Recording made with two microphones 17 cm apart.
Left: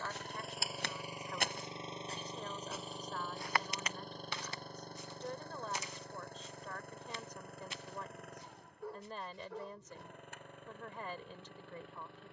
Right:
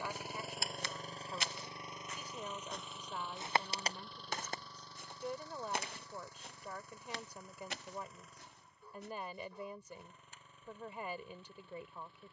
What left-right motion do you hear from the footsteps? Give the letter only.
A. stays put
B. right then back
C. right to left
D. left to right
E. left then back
D.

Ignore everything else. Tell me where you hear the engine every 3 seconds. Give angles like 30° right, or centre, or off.
20° left, 50° left, 60° left, 60° left.